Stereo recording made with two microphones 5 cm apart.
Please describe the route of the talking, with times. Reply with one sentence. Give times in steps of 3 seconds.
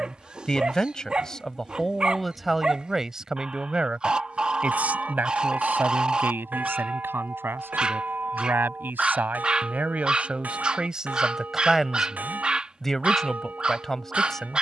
In this clip you hear the talking in the centre from 0 s, on the right from 3 s and in the centre from 12 s.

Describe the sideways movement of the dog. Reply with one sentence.
In this clip you hear the dog stay in one place.